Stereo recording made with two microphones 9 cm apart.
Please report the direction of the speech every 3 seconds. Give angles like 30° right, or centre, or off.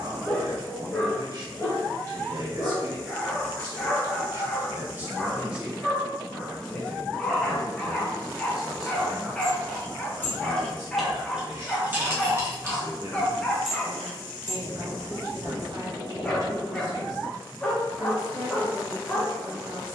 50° right, 30° right, 10° left, 30° right, 40° right, 40° right, 40° right.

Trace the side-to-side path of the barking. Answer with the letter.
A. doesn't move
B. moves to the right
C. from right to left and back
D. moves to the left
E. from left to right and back
A.